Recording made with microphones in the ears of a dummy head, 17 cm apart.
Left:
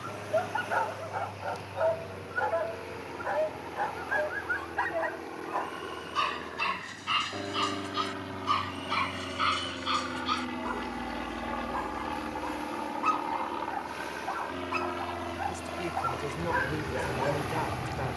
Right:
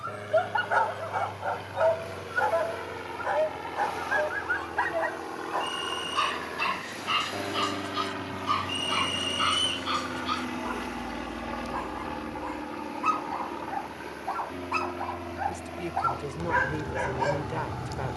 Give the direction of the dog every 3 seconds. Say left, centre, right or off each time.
right, centre, centre, centre, centre, right.